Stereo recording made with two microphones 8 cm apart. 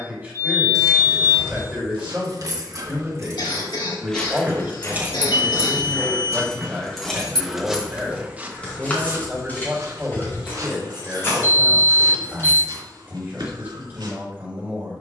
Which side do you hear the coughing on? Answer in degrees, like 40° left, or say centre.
70° left.